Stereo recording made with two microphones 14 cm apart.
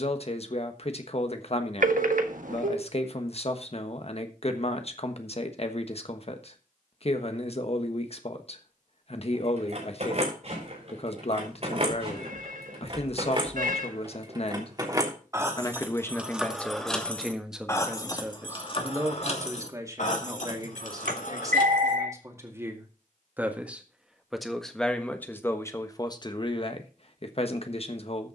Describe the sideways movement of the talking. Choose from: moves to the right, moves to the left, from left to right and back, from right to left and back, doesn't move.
from left to right and back.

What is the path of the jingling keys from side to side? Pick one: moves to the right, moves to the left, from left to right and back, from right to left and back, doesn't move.
moves to the left.